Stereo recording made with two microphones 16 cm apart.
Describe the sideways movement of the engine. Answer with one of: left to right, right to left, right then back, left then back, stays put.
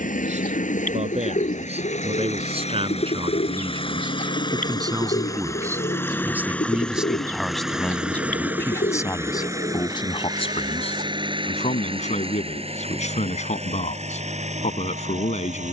left to right.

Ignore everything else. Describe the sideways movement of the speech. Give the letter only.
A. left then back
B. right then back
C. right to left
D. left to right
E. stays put
C.